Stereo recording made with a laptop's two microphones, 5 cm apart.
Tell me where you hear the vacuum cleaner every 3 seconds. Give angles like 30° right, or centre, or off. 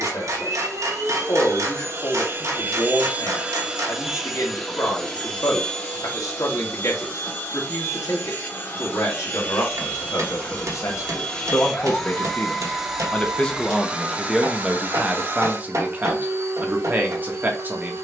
50° right, centre, 30° left, 20° left, 10° right, 50° right.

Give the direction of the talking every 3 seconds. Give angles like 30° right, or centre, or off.
70° left, 70° left, 70° left, 60° left, 10° left, 30° right.